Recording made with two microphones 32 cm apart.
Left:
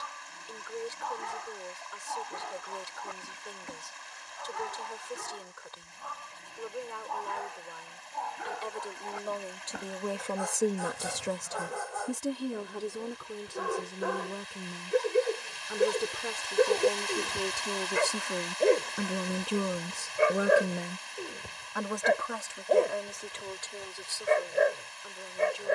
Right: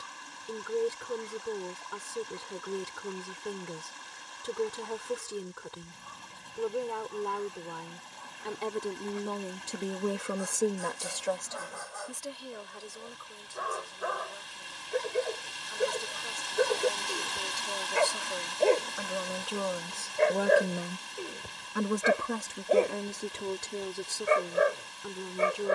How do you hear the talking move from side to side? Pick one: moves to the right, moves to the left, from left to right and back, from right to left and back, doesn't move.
from right to left and back.